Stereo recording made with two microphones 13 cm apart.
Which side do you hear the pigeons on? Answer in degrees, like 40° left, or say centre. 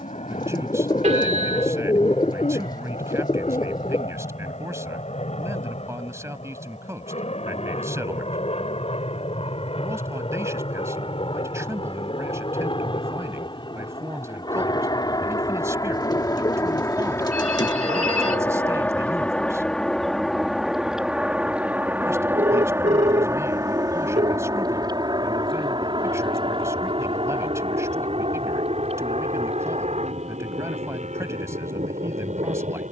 30° left.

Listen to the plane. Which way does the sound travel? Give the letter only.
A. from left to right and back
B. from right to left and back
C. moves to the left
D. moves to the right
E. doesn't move
D.